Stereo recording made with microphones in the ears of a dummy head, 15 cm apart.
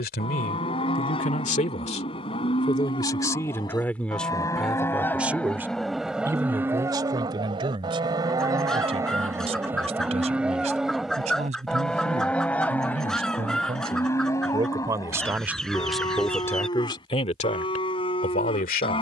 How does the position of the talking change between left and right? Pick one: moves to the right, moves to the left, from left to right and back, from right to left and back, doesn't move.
from left to right and back.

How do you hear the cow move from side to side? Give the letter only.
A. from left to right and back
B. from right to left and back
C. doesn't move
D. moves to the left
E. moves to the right
A.